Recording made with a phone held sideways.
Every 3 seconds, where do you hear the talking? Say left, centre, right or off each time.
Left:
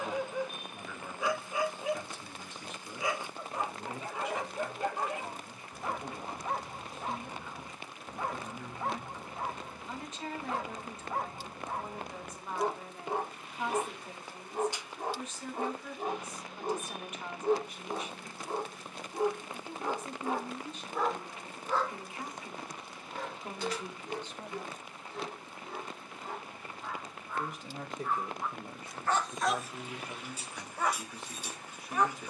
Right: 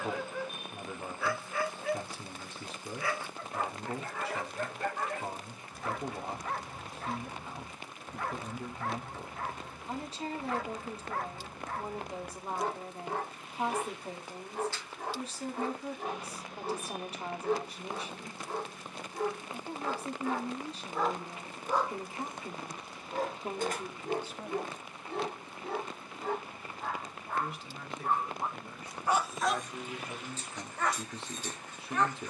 right, right, right, right, right, right, right, right, centre, left, right.